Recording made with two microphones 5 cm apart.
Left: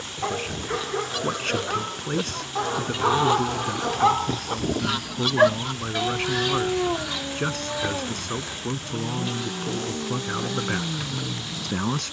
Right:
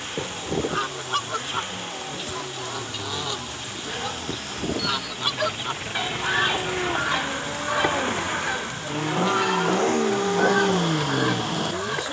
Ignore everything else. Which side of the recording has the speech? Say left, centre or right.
left.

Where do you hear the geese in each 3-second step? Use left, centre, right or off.
right, centre, right, right.